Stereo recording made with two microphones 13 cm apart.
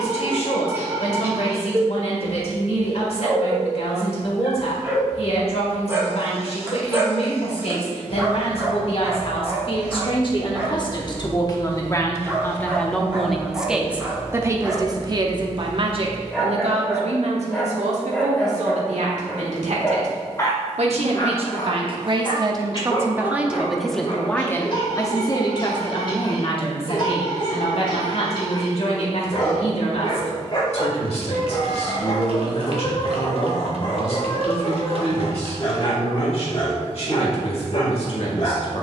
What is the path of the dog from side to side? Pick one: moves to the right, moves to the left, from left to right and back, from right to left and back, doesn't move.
moves to the left.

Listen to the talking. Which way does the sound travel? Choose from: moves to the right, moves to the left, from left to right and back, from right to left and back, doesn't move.
from left to right and back.